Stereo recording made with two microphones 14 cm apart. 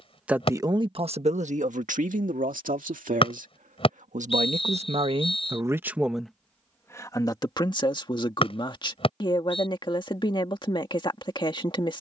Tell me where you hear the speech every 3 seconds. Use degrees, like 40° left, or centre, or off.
60° right, 50° right, 30° left, 40° left.